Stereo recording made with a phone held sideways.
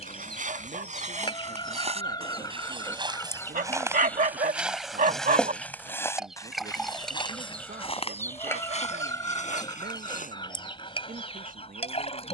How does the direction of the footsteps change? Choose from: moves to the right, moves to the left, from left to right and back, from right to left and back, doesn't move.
moves to the left.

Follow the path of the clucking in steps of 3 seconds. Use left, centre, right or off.
left, centre, centre, left.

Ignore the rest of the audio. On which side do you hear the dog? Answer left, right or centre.
right.